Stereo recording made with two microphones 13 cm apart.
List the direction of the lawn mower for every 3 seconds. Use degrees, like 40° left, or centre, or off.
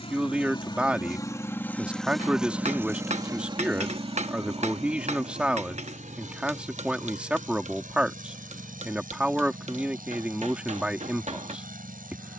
20° left, 50° right, 70° right, 80° right.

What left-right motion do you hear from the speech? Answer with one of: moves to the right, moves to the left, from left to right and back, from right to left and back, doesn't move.
doesn't move.